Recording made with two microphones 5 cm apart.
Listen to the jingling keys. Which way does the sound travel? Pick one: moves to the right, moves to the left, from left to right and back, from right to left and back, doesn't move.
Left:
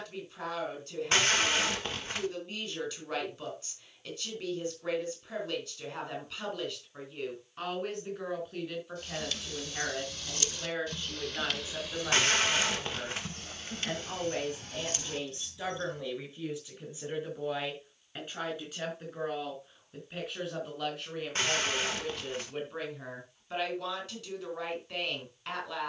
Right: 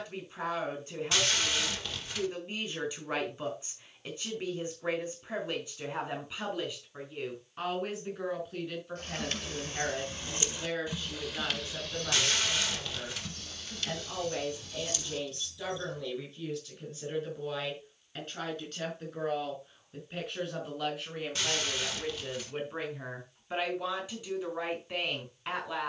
moves to the left.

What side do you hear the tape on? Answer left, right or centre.
left.